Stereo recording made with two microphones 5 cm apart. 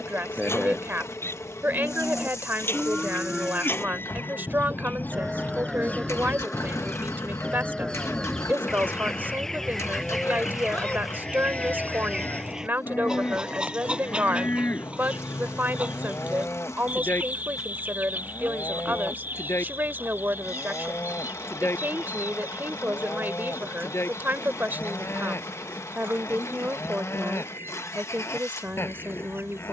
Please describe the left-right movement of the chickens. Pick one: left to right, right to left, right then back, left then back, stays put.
left to right.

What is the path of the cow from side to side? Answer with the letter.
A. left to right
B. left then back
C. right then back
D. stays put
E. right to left
E.